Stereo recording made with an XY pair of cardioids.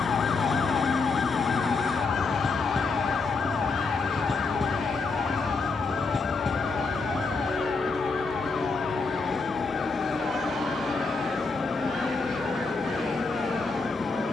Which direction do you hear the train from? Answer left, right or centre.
centre.